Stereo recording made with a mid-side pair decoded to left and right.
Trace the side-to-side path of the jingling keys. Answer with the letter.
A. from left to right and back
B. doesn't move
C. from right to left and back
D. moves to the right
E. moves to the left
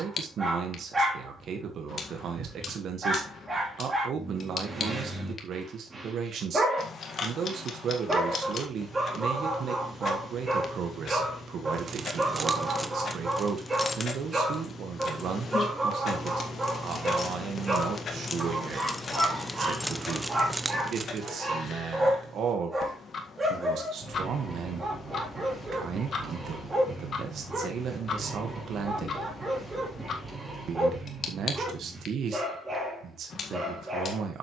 C.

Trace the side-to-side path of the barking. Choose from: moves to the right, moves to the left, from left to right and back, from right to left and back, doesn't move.
doesn't move.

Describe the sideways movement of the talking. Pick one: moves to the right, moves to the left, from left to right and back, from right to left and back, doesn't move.
doesn't move.